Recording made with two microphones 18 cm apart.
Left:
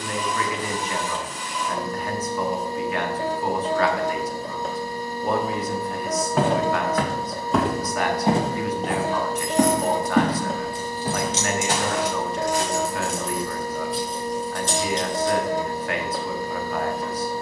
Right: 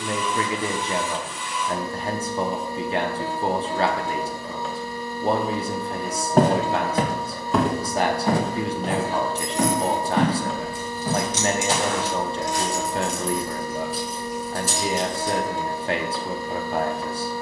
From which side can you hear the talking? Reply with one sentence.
You can hear the talking on the right.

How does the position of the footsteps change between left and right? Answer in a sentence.
In this clip you hear the footsteps move to the left.